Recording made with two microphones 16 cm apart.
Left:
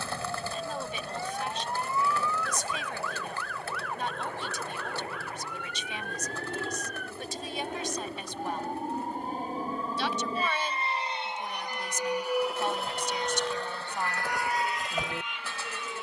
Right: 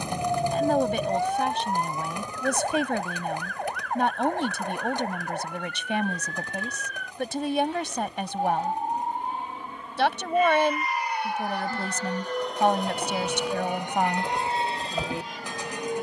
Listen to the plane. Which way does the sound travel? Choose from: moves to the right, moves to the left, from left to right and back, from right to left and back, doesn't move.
moves to the right.